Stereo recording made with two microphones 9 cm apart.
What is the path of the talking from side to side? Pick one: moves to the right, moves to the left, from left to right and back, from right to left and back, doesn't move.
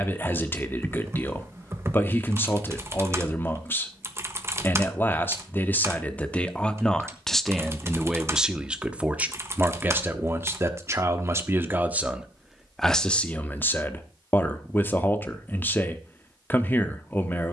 from left to right and back.